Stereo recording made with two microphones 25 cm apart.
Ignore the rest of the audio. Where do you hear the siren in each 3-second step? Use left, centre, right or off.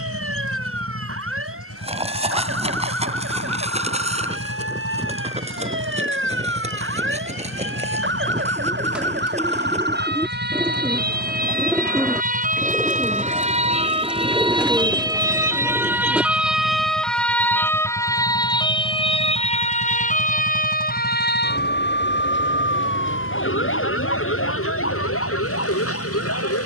right, right, right, right, right, centre, left, left, left.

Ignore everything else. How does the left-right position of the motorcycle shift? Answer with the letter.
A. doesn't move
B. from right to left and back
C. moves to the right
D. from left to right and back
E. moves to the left
A.